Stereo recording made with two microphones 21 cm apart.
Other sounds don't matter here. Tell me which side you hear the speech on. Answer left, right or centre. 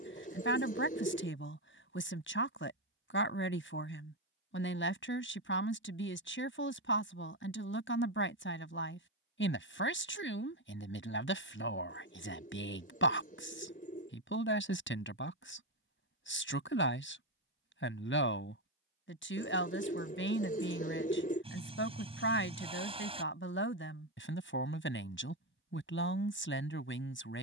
left.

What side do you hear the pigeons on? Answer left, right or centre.
left.